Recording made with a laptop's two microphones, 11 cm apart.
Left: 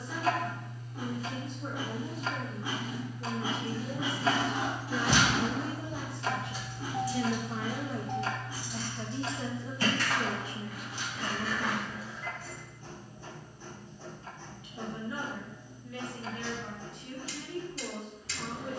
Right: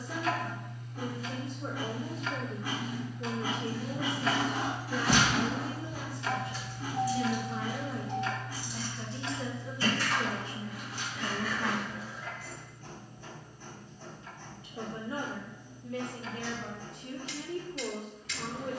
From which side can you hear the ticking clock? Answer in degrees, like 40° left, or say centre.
30° left.